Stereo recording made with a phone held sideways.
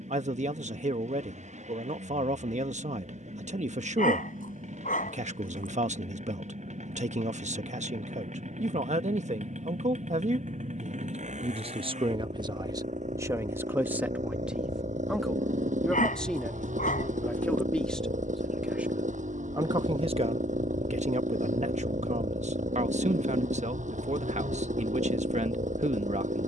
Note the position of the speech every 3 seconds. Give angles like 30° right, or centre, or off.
60° right, 60° right, 60° right, 50° right, 20° right, 10° left, 30° right, 50° right, 50° right.